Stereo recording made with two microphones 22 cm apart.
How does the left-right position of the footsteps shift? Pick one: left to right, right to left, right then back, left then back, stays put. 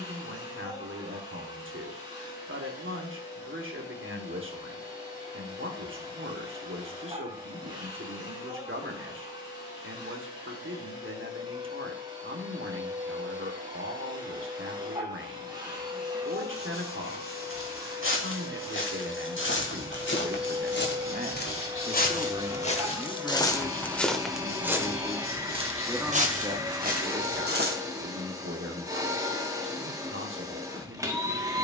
left to right.